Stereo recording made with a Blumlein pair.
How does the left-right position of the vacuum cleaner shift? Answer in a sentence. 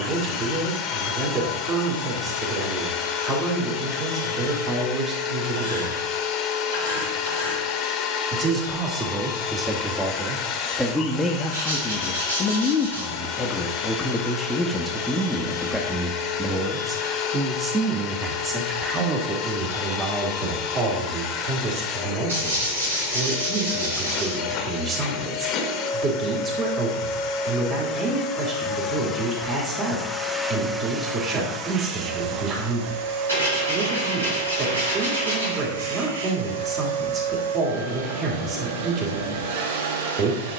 In this clip you hear the vacuum cleaner move to the right.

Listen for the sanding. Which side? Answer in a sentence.
You can hear the sanding on the right.